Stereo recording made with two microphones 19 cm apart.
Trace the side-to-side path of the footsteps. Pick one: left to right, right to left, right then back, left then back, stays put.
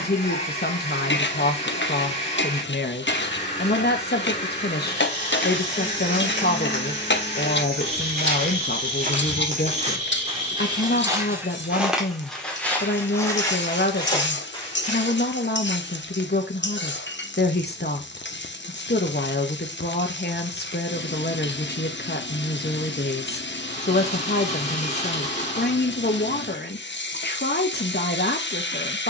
right to left.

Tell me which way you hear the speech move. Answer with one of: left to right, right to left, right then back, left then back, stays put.
stays put.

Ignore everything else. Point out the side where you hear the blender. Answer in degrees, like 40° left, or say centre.
40° left.